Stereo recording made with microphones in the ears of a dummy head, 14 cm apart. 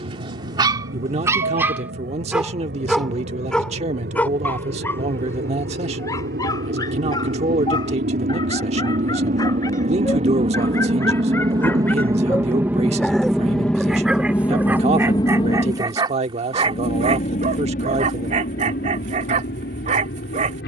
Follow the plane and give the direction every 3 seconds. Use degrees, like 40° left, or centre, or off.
70° right, 70° right, 60° right, 40° right, centre, 30° left, 50° left.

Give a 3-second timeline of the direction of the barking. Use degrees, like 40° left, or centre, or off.
20° right, 10° left, 20° left, 20° left, centre, 30° right, 40° right.